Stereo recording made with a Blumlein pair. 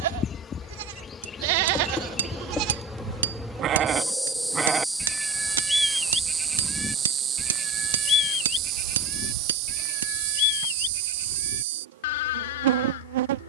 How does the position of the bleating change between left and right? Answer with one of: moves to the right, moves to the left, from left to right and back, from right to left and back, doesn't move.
moves to the left.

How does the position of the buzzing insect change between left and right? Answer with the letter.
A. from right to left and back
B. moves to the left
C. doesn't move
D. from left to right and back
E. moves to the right
E.